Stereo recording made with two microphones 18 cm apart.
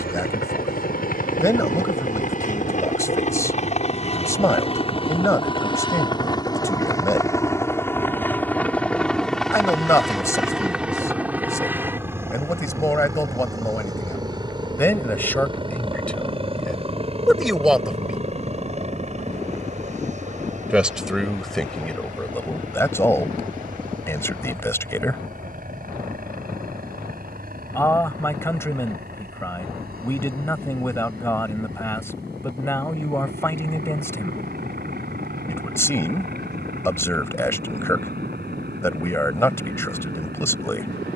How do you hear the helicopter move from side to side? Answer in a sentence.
In this clip you hear the helicopter move from left to right.